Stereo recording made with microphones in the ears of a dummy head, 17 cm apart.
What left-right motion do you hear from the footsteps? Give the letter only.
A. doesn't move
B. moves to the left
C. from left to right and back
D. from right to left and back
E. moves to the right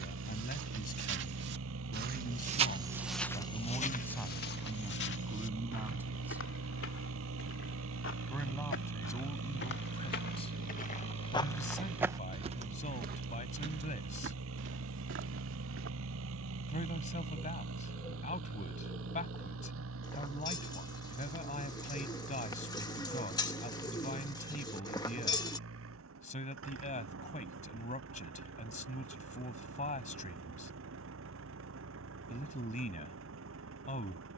D.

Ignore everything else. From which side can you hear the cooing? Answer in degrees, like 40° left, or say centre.
20° left.